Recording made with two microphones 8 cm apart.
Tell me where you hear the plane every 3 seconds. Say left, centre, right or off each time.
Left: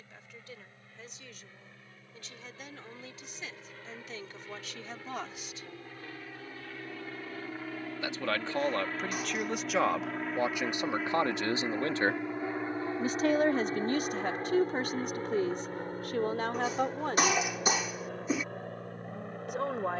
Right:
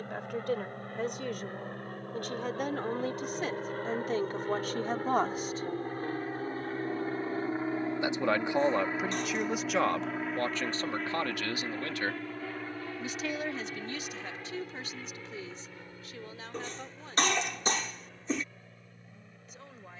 right, right, right, centre, left, left, left.